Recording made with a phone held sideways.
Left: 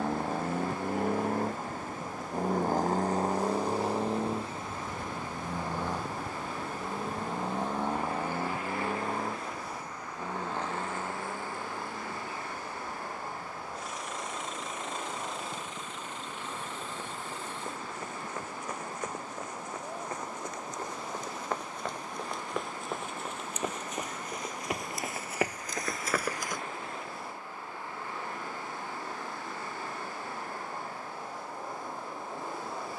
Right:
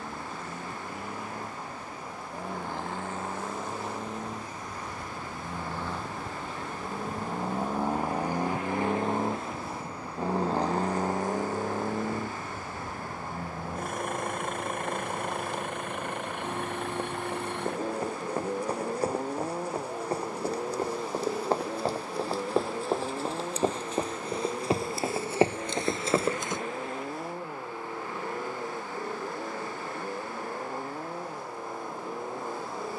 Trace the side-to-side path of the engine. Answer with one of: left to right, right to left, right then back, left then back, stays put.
left to right.